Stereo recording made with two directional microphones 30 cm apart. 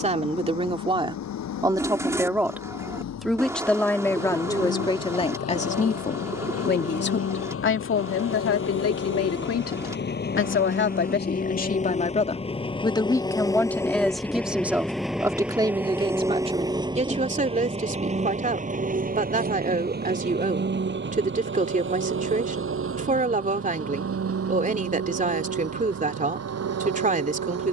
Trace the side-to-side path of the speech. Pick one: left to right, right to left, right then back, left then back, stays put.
left then back.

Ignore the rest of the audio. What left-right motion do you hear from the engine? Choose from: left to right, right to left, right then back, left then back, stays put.
left to right.